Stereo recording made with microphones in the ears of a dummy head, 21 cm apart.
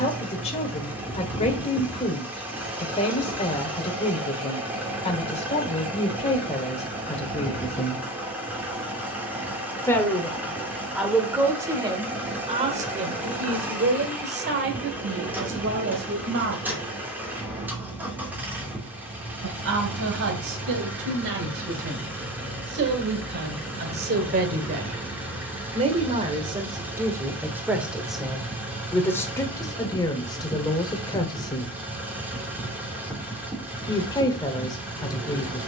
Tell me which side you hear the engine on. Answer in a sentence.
You can hear the engine in the centre.